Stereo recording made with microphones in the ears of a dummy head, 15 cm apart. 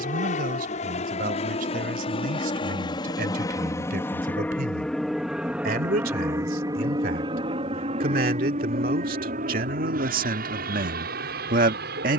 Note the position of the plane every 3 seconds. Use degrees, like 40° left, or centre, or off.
40° left, 10° left, 30° right, 50° right.